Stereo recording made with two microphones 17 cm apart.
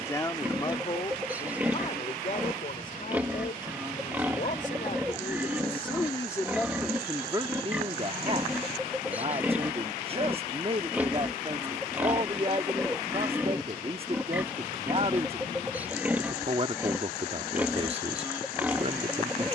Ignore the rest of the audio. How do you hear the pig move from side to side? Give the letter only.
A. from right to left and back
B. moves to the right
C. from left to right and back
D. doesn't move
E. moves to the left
D.